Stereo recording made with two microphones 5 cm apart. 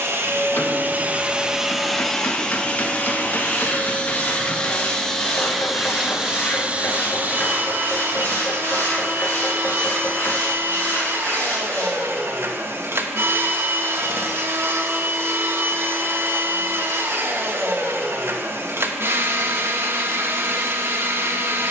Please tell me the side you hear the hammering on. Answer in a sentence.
You can hear the hammering on the left.